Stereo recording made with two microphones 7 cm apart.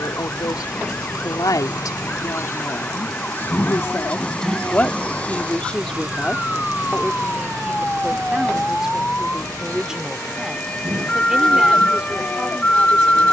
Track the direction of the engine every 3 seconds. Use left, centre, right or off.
left, centre, right, right, right.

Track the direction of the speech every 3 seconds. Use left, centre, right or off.
left, left, centre, centre, centre.